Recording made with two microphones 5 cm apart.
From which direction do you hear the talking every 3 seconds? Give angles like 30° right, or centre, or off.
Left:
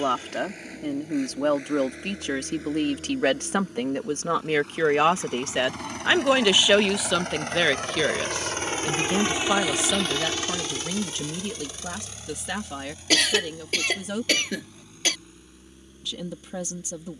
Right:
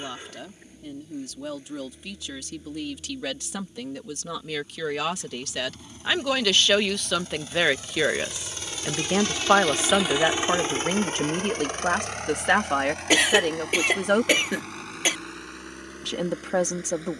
60° left, 40° left, centre, 40° right, 60° right, 60° right.